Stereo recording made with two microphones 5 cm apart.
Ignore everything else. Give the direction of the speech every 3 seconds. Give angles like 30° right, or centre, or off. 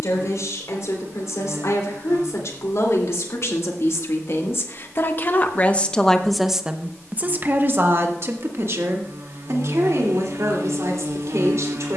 70° left, 50° left, 40° right, 70° right.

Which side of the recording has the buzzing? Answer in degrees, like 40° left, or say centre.
70° right.